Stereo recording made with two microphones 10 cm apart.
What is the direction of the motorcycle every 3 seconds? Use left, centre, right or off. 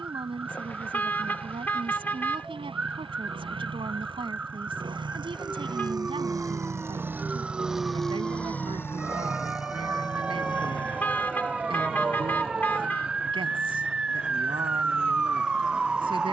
right, right, centre, left, left, left.